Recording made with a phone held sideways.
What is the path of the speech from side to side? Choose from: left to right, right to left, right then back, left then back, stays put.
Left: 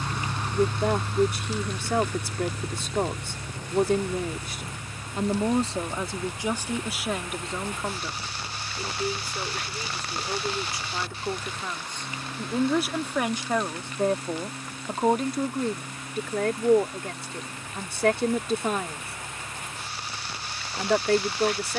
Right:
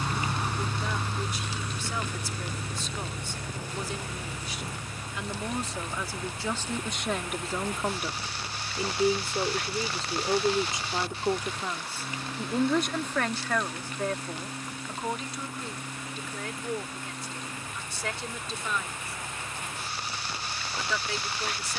right then back.